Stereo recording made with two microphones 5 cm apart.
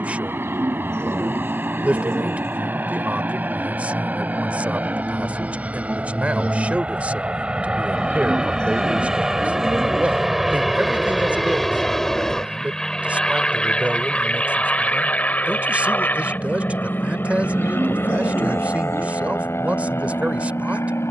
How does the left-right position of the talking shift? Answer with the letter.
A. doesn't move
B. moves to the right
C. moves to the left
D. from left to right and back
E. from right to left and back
A.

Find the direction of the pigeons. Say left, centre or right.
right.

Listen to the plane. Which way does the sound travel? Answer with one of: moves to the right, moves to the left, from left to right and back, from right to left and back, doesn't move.
moves to the left.